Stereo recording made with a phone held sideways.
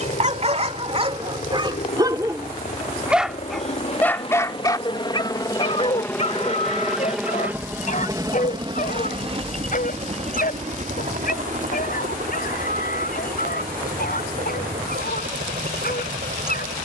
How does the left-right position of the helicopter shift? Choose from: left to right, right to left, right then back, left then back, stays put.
left to right.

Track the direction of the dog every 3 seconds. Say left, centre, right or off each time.
right, left, left, left, left, left.